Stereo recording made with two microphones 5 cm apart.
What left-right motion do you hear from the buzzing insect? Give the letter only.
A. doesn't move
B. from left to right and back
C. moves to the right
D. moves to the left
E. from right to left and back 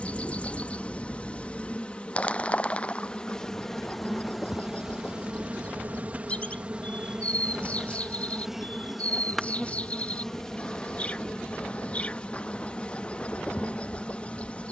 B.